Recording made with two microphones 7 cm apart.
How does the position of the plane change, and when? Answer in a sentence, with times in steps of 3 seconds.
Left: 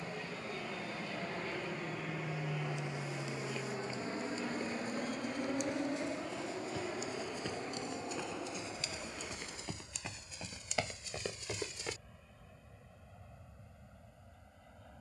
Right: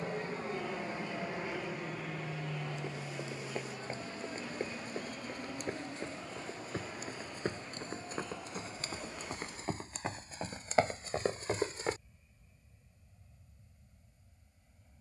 In this clip you hear the plane in the centre from 0 s and on the left from 3 s.